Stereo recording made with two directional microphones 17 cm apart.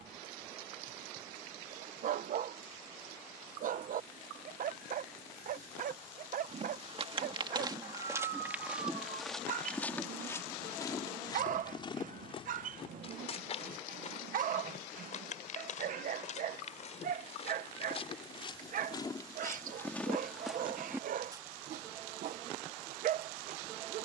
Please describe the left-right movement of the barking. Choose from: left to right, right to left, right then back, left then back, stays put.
stays put.